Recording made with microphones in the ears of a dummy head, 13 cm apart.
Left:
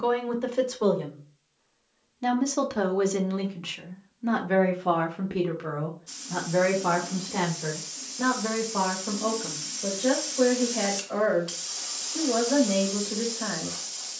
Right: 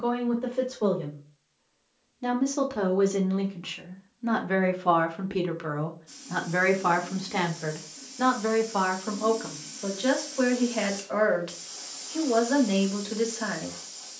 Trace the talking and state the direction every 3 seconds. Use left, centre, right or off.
left, centre, right, right, right.